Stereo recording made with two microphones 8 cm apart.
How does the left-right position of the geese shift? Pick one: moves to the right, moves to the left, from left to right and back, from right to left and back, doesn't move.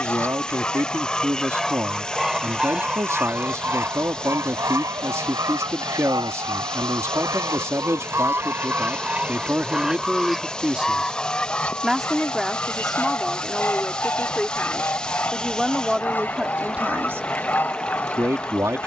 from left to right and back.